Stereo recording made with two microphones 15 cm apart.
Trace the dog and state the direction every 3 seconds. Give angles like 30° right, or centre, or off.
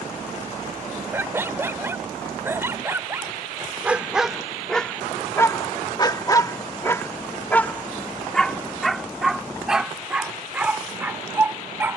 20° right, centre, 10° left, 10° right.